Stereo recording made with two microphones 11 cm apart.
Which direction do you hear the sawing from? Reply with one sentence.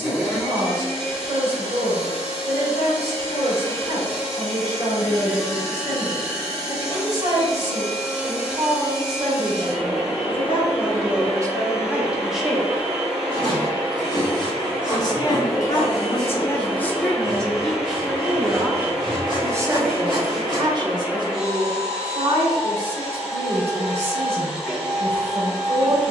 In this clip you hear the sawing on the right.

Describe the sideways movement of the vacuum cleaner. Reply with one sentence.
You can hear the vacuum cleaner stay put.